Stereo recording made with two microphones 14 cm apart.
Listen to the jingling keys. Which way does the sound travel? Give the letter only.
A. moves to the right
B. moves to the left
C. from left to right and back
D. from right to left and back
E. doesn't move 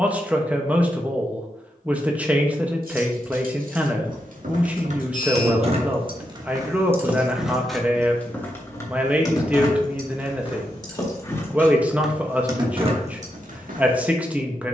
D.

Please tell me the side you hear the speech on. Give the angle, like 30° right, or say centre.
10° right.